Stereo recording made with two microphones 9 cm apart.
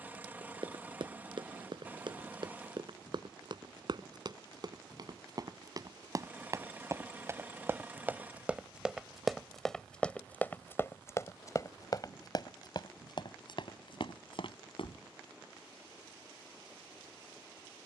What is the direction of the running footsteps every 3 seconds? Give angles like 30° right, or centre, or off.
60° right, 50° right, 20° right, 20° left, 60° left, off.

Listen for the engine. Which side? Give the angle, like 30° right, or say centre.
20° right.